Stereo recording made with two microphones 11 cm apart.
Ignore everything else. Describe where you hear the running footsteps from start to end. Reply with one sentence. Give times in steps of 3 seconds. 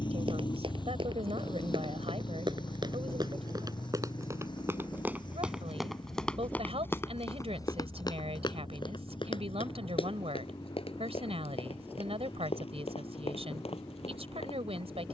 In this clip you hear the running footsteps on the right from 0 s and on the left from 6 s.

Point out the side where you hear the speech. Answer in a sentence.
In this clip you hear the speech on the right.